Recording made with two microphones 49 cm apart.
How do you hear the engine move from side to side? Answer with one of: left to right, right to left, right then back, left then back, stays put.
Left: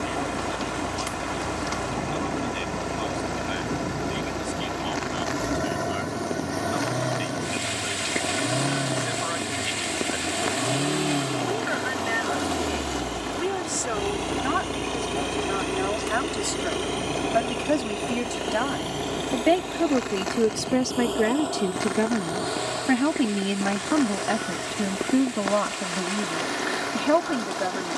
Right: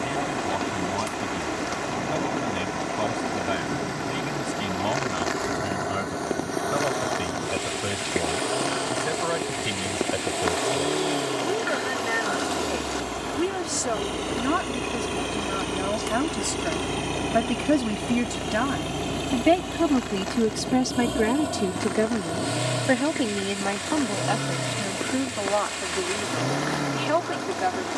left to right.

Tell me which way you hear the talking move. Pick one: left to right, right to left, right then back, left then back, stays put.
right to left.